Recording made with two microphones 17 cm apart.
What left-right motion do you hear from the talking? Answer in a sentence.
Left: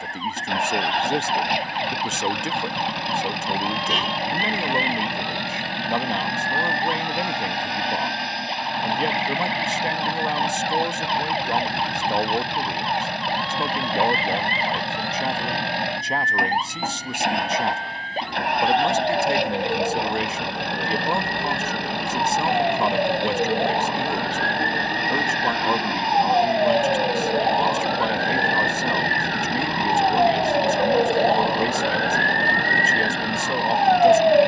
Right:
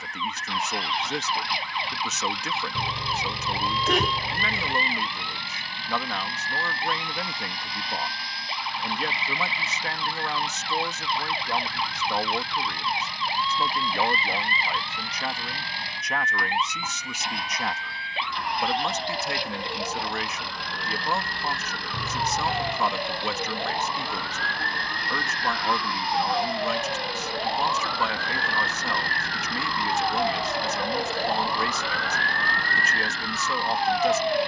You can hear the talking stay put.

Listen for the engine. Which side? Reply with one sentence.
In this clip you hear the engine on the left.